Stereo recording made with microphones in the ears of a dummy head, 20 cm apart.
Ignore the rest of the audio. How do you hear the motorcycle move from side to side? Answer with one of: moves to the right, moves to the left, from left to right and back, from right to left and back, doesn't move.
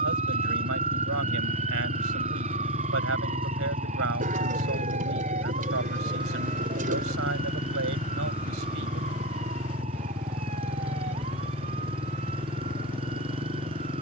doesn't move.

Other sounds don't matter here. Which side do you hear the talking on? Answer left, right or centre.
right.